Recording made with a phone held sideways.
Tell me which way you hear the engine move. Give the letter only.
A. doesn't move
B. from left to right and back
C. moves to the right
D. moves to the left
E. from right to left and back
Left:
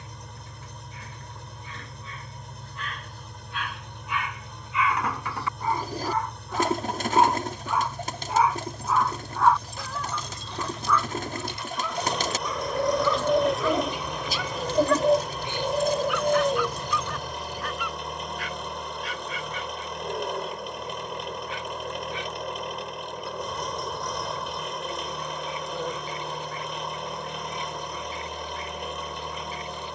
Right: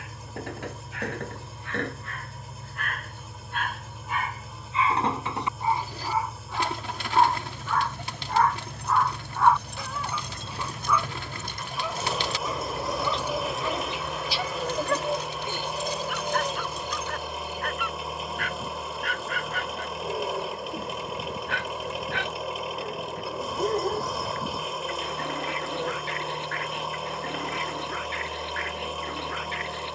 A.